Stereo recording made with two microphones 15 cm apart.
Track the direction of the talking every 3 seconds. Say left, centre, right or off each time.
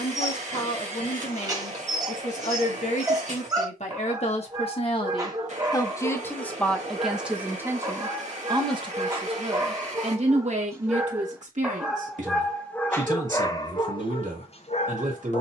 left, left, centre, right, right.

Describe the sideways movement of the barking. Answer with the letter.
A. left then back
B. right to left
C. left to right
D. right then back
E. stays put
B.